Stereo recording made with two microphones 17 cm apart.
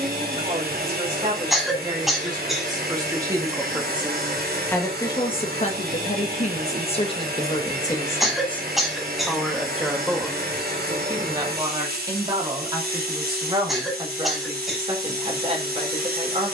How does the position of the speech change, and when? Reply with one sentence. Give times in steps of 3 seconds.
You can hear the speech on the right from 0 s, in the centre from 3 s, on the left from 6 s, in the centre from 9 s and on the right from 12 s.